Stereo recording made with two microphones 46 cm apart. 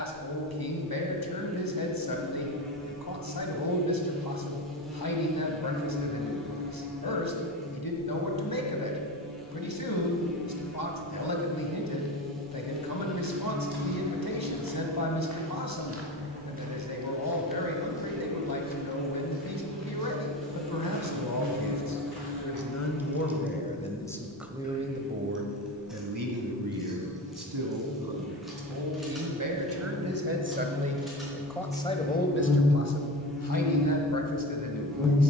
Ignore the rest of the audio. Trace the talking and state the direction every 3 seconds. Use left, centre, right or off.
left, left, left, left, left, left, left, left, right, right, centre, left.